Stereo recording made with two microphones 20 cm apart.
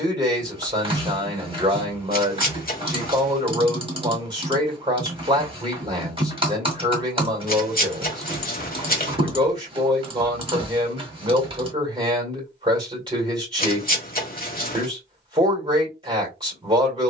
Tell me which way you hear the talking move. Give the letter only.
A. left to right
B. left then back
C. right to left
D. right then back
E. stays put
E.